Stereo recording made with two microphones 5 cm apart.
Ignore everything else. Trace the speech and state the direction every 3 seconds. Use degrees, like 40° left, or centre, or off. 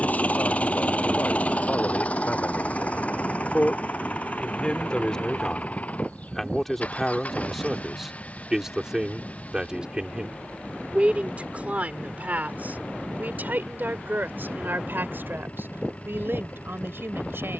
40° left, 20° left, centre, 30° right, 40° right, 60° right.